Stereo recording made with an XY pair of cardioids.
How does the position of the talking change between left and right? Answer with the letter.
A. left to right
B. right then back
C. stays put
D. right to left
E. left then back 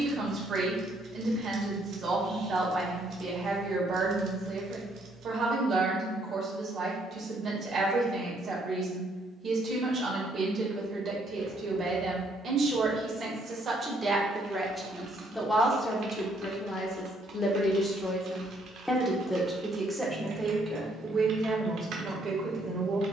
E.